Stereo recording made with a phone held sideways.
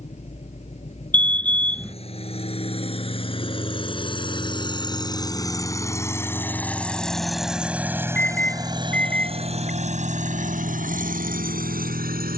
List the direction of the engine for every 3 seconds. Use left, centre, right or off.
left, left, centre, right.